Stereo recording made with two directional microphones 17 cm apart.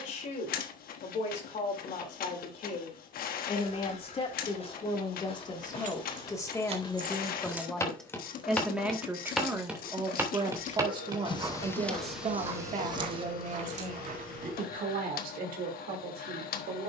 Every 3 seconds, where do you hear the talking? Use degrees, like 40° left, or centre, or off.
50° left, 30° left, 10° left, 20° right, 50° right, 60° right.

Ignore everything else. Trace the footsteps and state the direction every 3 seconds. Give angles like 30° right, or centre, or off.
off, 40° left, 20° left, 20° right, 40° right, off.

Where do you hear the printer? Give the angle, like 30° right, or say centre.
60° left.